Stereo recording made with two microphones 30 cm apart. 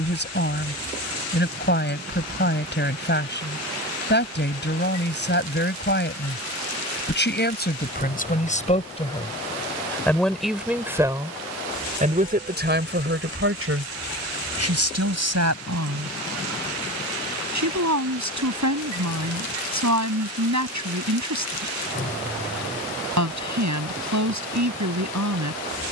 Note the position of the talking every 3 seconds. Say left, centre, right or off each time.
left, left, left, centre, right, right, right, right, right.